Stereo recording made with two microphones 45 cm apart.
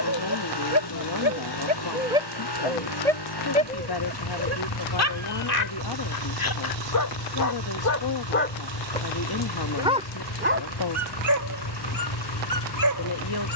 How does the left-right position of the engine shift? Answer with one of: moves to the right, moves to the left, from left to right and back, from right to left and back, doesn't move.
doesn't move.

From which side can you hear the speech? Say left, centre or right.
left.